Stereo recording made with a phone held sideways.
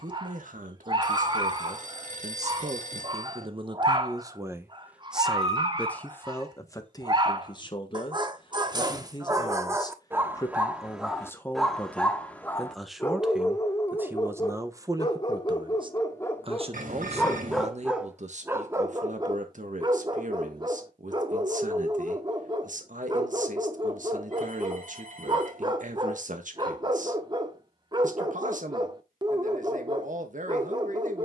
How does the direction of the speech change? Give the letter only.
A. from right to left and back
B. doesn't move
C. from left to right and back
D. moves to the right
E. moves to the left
A.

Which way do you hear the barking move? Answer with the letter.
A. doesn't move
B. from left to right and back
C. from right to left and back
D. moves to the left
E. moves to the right
C.